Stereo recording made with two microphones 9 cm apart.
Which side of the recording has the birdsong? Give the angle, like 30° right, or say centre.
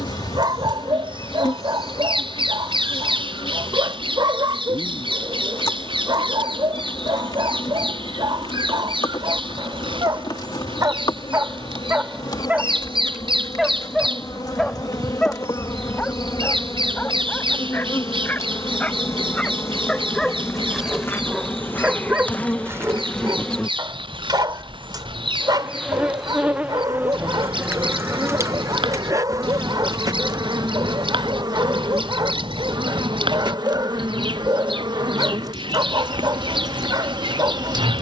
70° right.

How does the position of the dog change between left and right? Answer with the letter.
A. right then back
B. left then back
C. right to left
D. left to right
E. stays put
B.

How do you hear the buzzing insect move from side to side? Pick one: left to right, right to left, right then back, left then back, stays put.
left to right.